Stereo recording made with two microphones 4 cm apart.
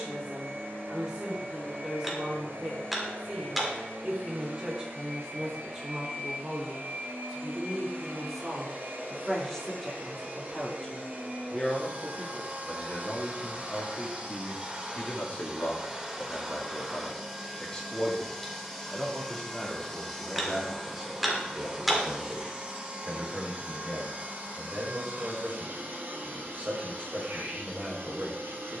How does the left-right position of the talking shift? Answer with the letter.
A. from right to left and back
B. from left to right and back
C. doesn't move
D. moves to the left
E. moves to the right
A.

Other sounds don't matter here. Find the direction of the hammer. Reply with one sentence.
You can hear the hammer in the centre.